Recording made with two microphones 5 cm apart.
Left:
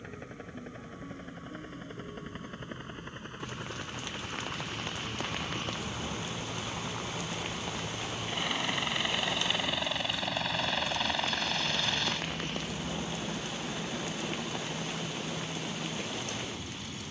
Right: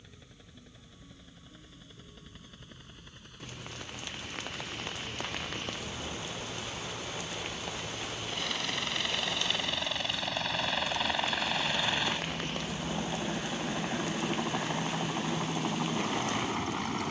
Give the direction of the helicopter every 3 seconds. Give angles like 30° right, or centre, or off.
50° left, 40° left, 20° left, centre, 20° right, 40° right.